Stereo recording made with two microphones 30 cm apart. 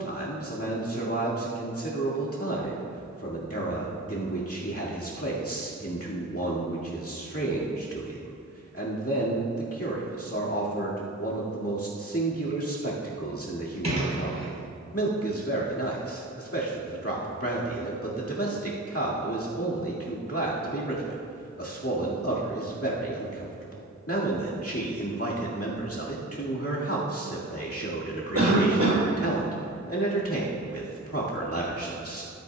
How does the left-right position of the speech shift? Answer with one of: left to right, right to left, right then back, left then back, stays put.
stays put.